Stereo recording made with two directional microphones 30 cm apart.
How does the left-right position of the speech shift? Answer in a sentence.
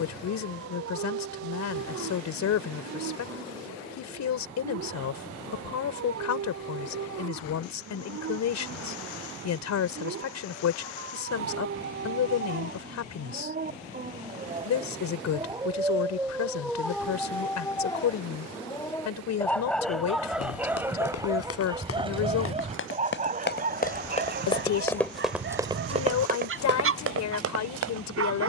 You can hear the speech stay put.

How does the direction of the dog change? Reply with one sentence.
You can hear the dog go left and come back.